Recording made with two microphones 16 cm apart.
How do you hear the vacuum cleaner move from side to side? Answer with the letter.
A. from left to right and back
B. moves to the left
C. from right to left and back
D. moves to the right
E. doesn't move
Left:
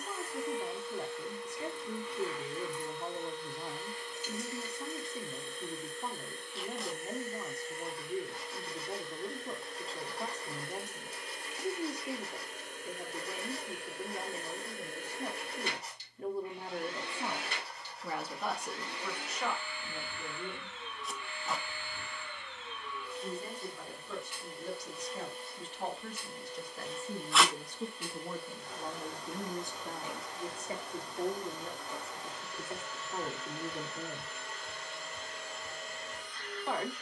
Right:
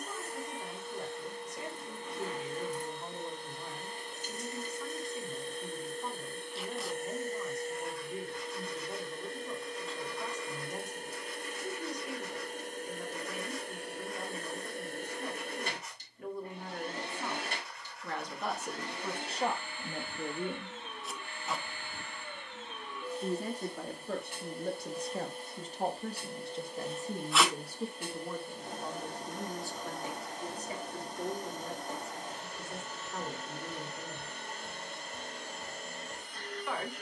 E.